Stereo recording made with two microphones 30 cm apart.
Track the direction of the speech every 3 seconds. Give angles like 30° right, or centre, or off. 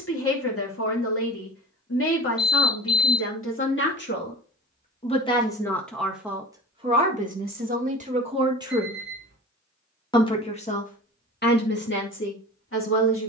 50° left, 30° left, 20° right, 30° left, 40° left.